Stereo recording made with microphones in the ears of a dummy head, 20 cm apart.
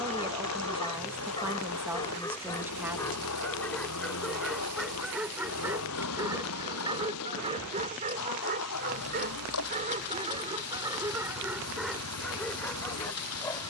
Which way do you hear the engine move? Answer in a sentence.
You can hear the engine stay in one place.